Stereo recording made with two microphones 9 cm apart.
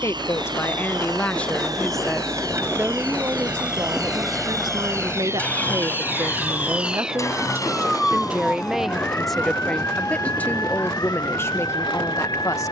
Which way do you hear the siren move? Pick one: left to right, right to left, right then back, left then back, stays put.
right to left.